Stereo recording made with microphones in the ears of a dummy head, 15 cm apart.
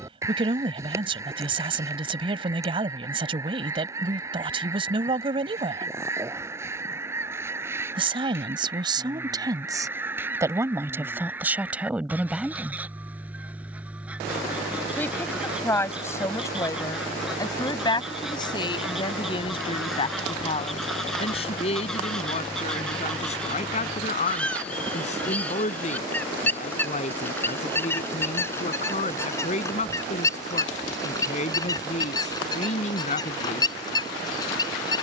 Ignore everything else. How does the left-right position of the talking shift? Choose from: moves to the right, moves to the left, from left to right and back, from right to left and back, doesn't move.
moves to the left.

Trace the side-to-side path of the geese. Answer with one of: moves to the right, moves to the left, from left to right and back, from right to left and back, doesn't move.
moves to the left.